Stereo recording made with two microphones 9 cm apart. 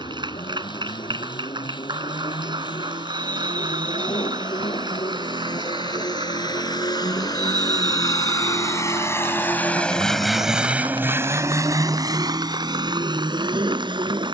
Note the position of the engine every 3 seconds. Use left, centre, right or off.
left, left, left, centre, right.